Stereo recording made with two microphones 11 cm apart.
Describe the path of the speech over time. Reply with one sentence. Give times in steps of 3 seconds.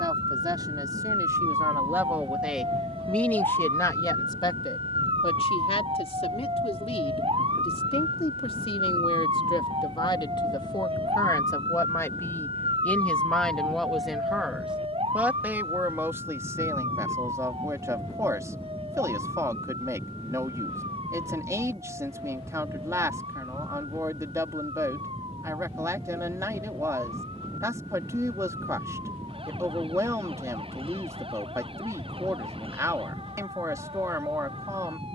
You can hear the speech on the right from 0 s, on the left from 3 s, in the centre from 12 s and on the right from 15 s.